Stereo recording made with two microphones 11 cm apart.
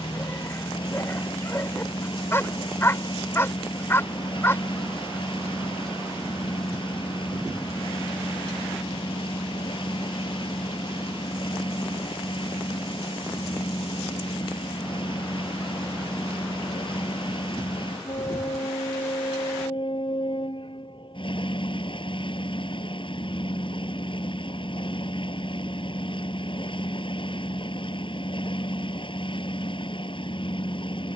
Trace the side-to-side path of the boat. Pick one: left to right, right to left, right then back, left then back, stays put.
stays put.